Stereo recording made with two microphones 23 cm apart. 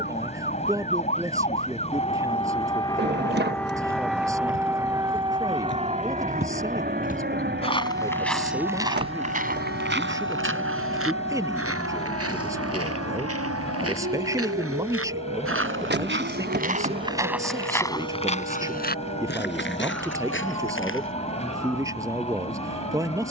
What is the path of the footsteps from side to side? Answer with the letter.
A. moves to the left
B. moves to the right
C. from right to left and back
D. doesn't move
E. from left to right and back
E.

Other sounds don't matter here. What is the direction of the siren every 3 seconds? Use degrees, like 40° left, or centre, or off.
30° left, 10° right, 40° right, 60° right, 70° right, 80° right, 80° right, 80° right.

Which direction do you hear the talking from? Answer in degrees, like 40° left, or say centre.
10° right.